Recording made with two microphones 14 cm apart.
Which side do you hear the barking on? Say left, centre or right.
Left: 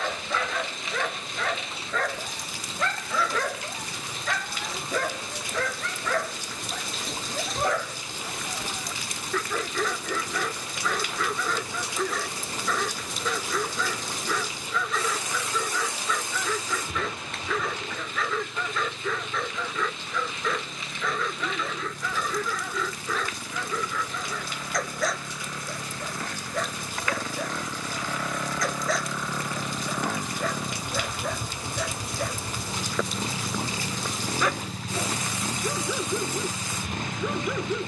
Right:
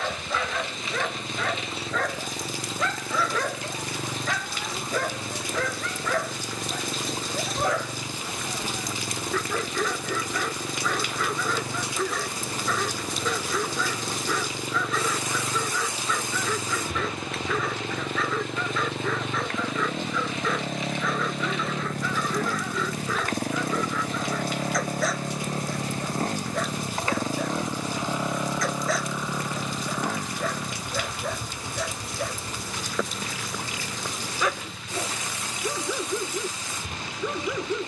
centre.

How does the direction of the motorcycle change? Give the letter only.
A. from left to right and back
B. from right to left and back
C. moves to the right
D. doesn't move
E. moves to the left
E.